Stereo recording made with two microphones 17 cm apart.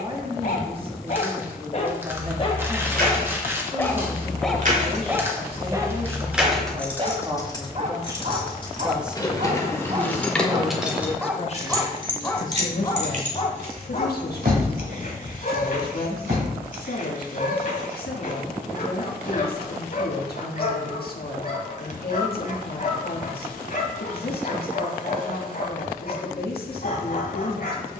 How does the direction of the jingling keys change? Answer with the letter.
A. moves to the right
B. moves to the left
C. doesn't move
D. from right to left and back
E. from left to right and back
D.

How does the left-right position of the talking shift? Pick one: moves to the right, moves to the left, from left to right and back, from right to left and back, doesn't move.
moves to the left.